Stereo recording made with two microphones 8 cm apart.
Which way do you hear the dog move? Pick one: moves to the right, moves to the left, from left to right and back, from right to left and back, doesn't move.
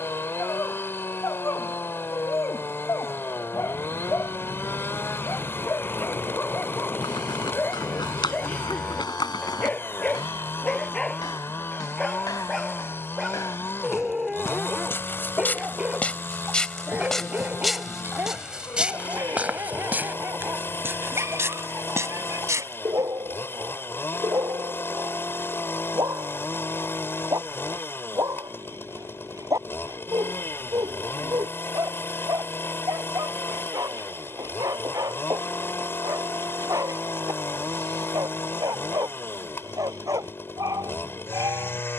moves to the right.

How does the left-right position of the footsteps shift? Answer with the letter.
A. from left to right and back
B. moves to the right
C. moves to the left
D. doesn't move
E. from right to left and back
B.